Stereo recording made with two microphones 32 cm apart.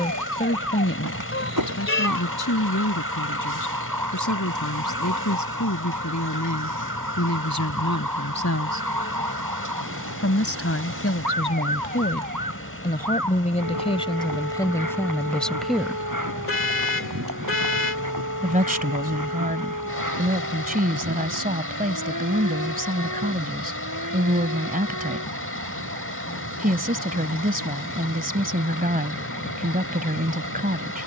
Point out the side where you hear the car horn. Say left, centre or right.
left.